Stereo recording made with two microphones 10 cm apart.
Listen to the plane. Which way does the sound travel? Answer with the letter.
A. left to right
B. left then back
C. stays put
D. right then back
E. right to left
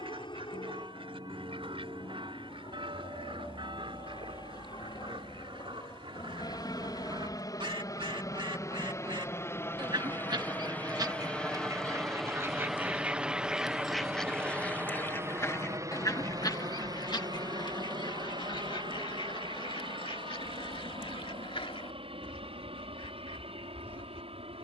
A.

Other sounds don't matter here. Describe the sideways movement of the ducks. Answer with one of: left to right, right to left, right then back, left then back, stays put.
right to left.